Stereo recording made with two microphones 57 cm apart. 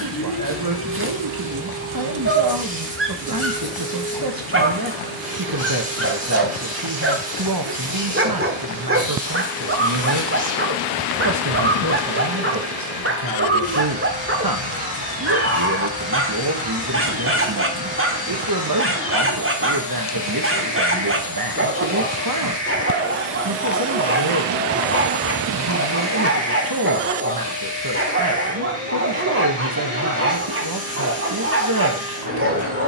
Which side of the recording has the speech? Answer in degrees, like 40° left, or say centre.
40° right.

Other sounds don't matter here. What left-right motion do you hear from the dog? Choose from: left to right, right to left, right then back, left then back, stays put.
stays put.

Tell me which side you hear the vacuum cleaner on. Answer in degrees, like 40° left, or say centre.
30° left.